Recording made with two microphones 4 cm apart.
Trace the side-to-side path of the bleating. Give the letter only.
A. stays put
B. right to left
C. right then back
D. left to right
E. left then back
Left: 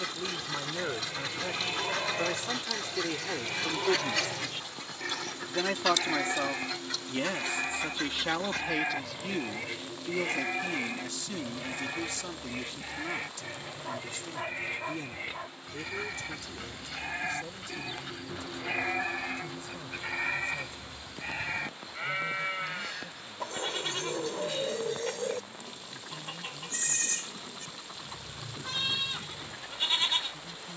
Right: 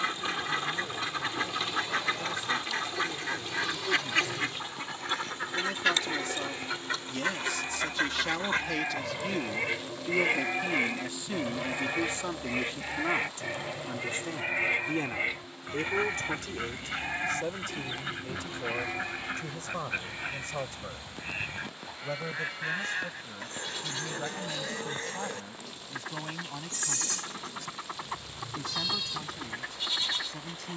C.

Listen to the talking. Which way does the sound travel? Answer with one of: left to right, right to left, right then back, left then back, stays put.
left to right.